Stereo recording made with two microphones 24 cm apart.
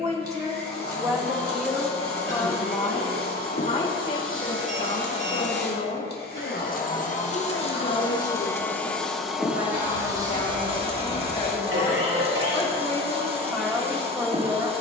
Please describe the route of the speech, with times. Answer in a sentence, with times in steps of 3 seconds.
In this clip you hear the speech in the centre from 0 s, on the left from 3 s and in the centre from 12 s.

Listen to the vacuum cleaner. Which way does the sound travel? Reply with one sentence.
You can hear the vacuum cleaner move from left to right.